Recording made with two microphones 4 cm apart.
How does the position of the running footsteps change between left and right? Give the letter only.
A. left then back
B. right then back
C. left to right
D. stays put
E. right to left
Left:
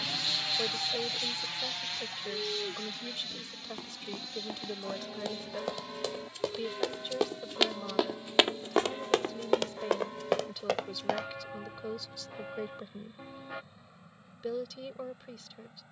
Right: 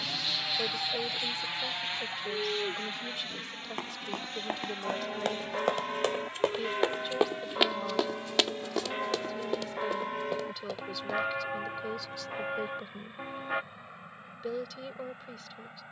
E.